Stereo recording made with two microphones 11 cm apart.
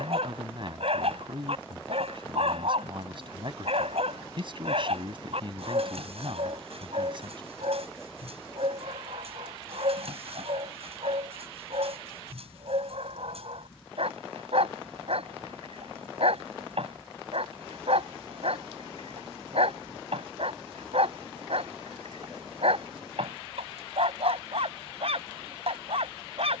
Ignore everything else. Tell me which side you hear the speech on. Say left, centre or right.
right.